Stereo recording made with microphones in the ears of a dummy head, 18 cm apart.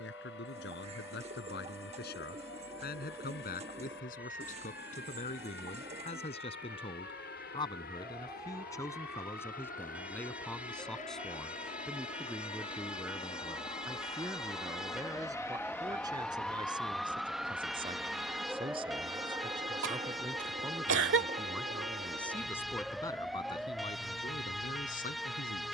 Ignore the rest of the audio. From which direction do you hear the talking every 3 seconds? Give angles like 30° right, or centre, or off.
50° left, 40° left, 20° left, 10° left, 10° right, 20° right, 20° right, 10° left, 40° left.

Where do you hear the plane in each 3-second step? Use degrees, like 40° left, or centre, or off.
70° left, 60° left, 60° left, 40° left, 30° left, 10° left, 20° right, 40° right, 50° right.